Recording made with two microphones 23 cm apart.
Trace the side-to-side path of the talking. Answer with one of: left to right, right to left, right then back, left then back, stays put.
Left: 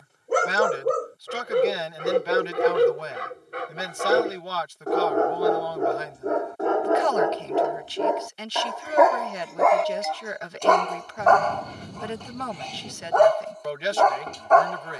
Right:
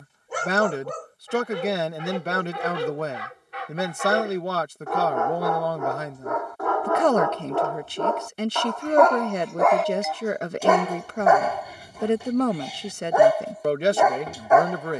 stays put.